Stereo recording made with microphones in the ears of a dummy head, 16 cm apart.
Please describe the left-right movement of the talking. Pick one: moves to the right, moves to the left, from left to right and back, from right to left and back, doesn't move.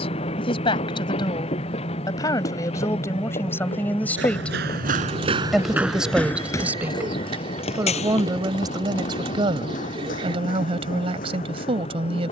moves to the right.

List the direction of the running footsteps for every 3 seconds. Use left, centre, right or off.
off, right, left, left.